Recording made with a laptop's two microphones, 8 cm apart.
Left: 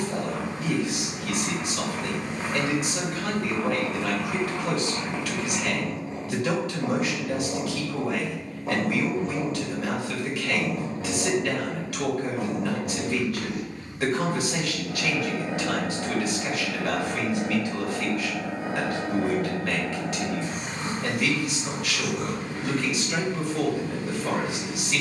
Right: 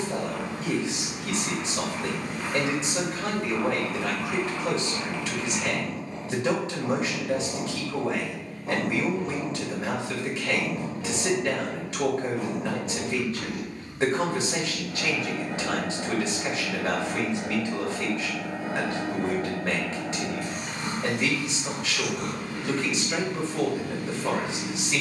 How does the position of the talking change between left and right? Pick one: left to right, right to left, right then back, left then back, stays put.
stays put.